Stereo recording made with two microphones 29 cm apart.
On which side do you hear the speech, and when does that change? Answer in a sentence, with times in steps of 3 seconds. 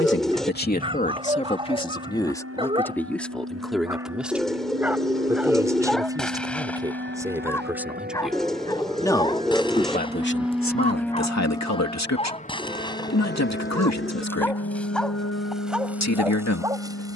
You can hear the speech on the left from 0 s, in the centre from 3 s and on the left from 9 s.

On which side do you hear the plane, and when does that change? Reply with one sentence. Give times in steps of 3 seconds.
In this clip you hear the plane on the right from 0 s, in the centre from 9 s and on the left from 12 s.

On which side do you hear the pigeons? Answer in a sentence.
You can hear the pigeons in the centre.